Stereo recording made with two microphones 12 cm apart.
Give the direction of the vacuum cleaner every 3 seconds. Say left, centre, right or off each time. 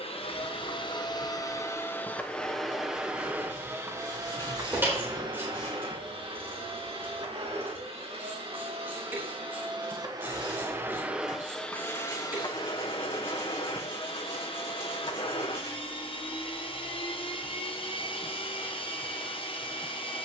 left, right, right, right, left, left, left.